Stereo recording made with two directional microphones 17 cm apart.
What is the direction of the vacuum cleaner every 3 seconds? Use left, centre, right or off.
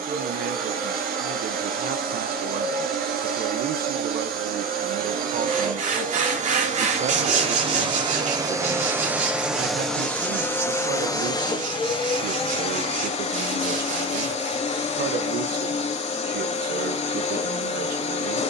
right, right, right, centre, left, left.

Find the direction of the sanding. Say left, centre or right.
right.